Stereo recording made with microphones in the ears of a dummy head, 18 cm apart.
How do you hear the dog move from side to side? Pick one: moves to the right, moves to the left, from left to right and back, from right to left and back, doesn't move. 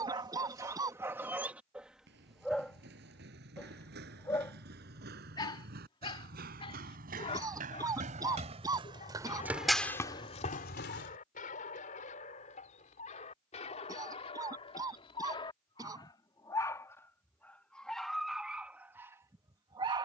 from right to left and back.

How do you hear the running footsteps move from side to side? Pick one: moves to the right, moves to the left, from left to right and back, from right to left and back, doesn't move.
moves to the left.